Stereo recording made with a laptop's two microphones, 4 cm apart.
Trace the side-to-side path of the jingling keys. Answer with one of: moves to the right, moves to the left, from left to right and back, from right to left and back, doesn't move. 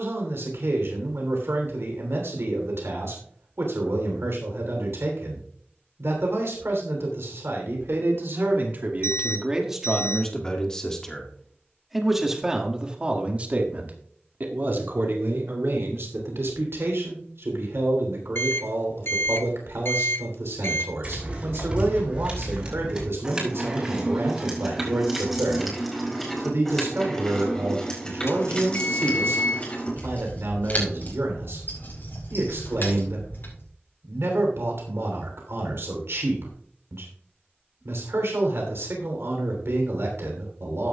moves to the left.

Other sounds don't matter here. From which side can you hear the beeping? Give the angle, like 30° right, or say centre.
60° left.